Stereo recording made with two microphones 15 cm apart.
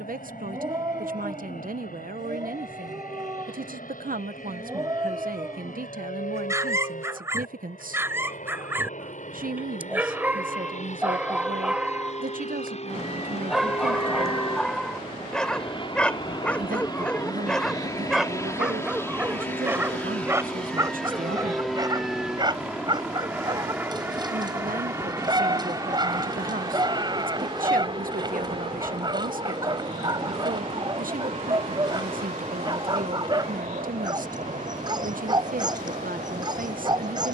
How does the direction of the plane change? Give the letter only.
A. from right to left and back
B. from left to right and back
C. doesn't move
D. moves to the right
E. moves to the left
D.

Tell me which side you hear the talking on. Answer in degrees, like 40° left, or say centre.
70° right.